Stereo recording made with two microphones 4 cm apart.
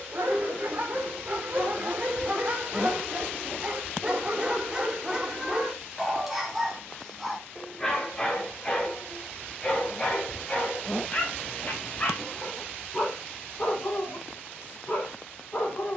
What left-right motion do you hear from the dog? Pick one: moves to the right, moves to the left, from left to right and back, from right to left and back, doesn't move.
moves to the left.